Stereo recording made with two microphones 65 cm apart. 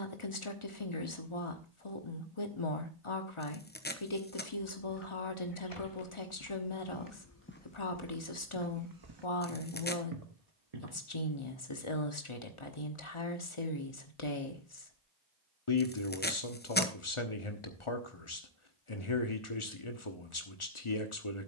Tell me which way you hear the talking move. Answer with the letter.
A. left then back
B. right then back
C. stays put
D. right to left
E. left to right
C.